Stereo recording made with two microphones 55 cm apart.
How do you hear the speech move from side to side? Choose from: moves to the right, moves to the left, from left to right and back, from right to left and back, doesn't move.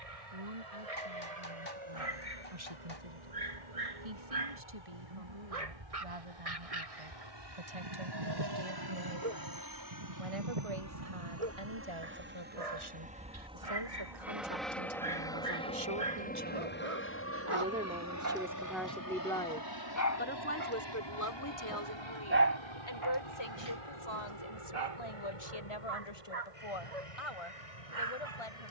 moves to the left.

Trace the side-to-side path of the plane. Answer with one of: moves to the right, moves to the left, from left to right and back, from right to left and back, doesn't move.
moves to the left.